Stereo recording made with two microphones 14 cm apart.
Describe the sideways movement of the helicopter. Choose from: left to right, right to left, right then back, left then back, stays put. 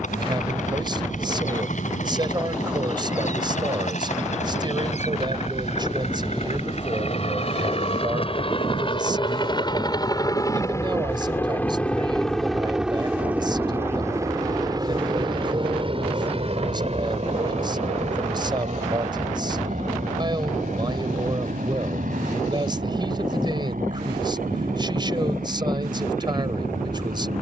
left to right.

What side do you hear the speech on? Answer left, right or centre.
right.